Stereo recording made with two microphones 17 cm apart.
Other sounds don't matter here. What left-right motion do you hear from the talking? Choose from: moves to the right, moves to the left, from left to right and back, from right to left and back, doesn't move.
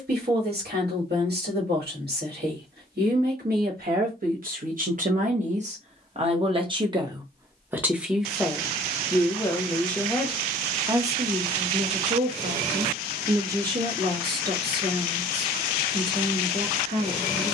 from right to left and back.